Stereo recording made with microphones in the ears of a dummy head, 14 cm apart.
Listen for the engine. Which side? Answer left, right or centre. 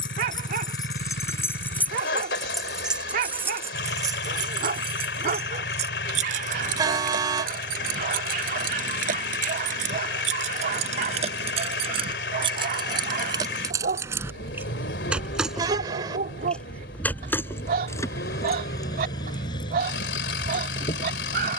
left.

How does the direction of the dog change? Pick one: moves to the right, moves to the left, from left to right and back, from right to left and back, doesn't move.
doesn't move.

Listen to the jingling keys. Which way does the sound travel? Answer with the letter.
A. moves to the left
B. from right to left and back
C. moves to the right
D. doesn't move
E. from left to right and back
E.